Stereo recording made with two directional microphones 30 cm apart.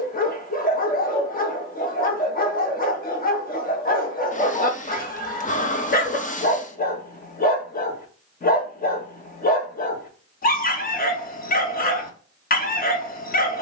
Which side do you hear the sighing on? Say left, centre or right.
left.